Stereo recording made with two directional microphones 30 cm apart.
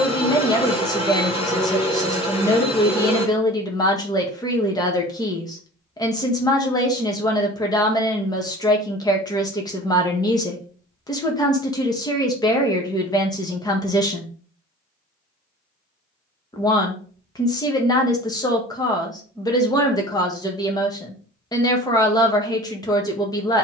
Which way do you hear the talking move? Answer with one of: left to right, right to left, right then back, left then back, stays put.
stays put.